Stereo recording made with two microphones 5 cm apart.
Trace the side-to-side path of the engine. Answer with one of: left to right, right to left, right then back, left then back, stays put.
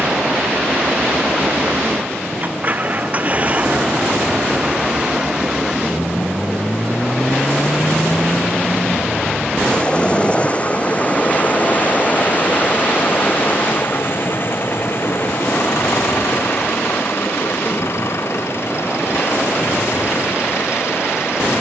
right to left.